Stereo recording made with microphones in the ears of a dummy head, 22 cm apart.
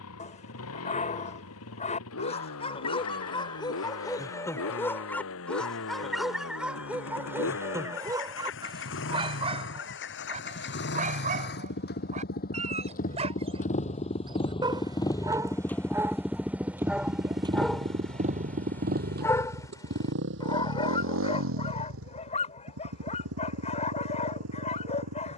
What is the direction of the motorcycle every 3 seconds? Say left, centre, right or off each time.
left, left, left, left, left, centre, right, right, right.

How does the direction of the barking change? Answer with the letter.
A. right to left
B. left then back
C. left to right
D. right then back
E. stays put
D.